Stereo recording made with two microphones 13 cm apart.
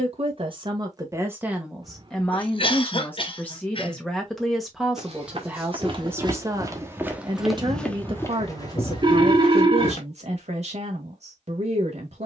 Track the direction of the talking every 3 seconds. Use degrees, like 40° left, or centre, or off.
10° right, centre, 40° right, 60° right.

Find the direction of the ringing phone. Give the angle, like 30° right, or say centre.
40° right.